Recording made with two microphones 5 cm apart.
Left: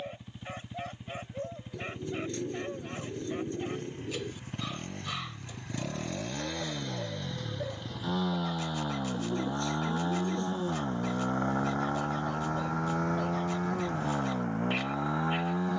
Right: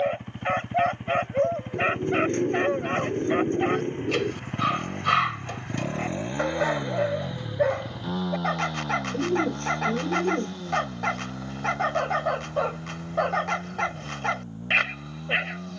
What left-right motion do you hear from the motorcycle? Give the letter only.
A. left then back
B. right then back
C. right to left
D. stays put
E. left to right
C.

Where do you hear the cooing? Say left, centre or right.
right.